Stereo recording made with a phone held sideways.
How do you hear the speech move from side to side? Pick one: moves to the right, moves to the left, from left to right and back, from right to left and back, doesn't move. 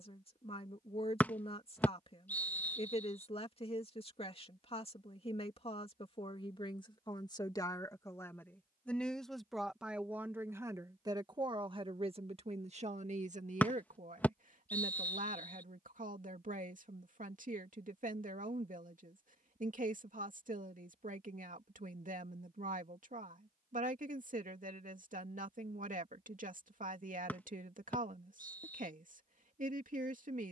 moves to the right.